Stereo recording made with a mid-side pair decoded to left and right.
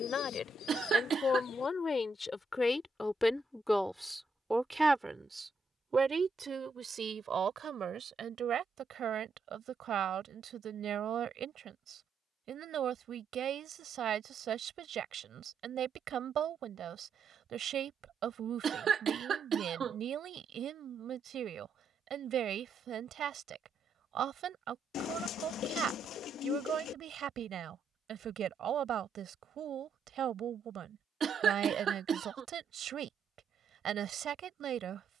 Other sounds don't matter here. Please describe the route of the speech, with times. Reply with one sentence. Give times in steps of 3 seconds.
You can hear the speech on the left from 0 s, in the centre from 3 s and on the right from 6 s.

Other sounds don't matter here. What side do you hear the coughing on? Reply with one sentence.
You can hear the coughing on the right.